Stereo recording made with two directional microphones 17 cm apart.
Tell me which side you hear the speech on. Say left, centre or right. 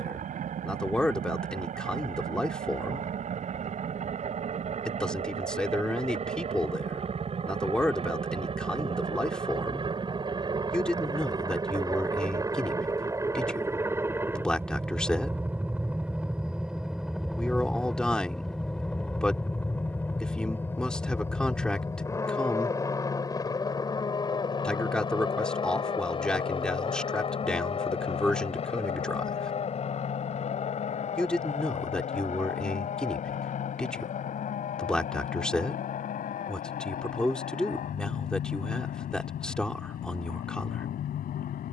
centre.